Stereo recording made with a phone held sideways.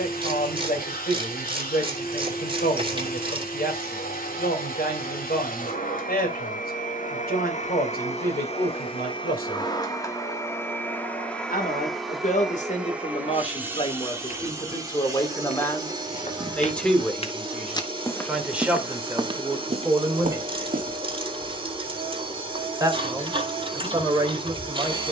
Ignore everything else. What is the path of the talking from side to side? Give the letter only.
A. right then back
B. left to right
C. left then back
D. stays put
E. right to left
B.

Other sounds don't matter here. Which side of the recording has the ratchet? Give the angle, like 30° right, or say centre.
30° right.